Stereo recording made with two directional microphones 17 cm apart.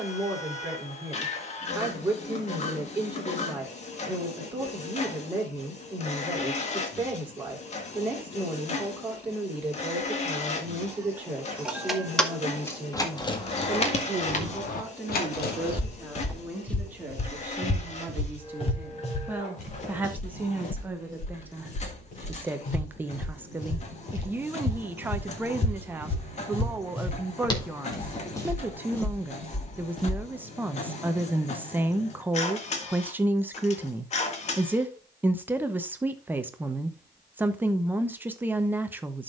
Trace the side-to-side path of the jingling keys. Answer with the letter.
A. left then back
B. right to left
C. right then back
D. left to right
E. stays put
B.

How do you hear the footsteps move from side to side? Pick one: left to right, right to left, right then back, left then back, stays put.
left then back.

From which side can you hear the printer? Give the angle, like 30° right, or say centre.
40° left.